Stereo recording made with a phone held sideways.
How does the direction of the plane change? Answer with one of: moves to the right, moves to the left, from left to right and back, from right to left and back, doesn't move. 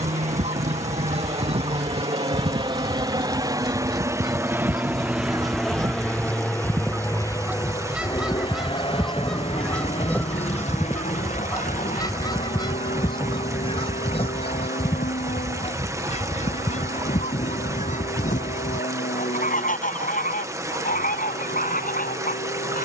moves to the left.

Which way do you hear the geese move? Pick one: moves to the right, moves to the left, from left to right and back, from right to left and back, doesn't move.
moves to the left.